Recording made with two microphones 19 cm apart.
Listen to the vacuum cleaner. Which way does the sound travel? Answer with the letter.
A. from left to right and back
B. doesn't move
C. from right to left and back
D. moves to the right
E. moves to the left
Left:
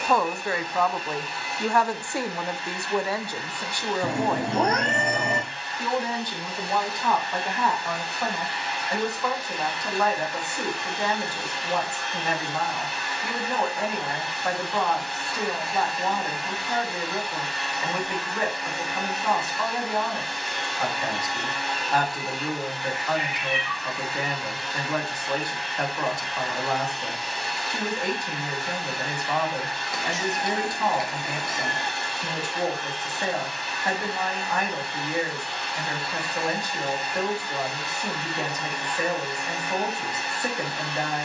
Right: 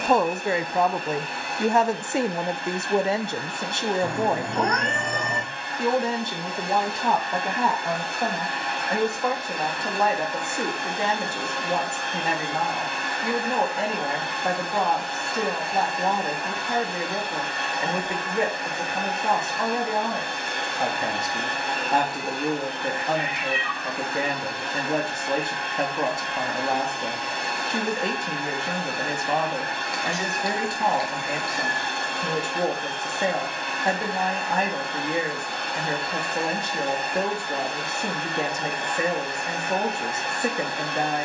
B.